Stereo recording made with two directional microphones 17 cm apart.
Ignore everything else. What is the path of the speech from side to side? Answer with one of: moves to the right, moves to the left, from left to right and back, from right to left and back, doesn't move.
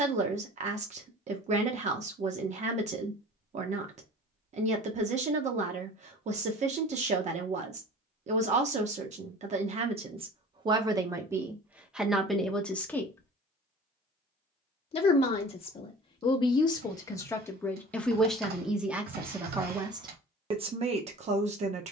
from right to left and back.